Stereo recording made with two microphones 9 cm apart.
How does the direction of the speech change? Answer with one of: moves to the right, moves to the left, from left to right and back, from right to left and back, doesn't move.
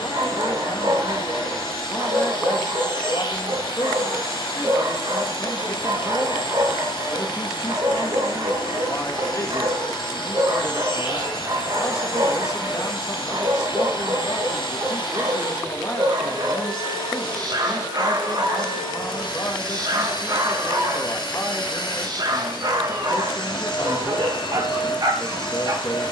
doesn't move.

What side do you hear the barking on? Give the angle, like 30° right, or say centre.
50° right.